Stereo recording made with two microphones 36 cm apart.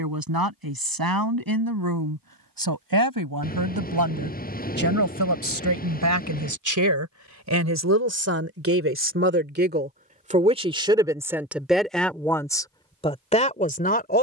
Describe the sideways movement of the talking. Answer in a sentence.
You can hear the talking go from the right side to the left.